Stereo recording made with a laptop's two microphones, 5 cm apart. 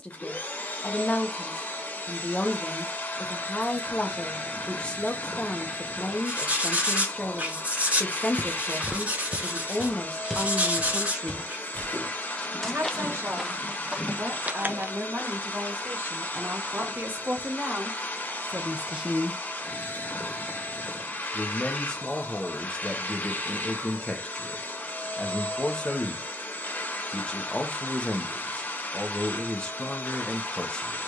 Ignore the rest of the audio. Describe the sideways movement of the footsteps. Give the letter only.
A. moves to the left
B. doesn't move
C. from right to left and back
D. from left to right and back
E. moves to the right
C.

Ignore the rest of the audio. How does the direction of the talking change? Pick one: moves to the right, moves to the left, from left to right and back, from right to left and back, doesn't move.
from left to right and back.